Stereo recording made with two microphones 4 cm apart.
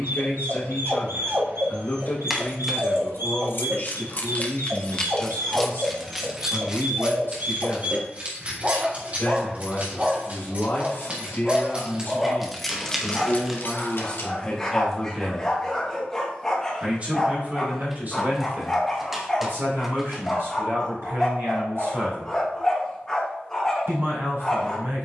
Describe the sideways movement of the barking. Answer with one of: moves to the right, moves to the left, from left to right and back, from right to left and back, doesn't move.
moves to the left.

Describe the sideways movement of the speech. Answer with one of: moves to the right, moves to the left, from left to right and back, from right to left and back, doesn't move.
moves to the right.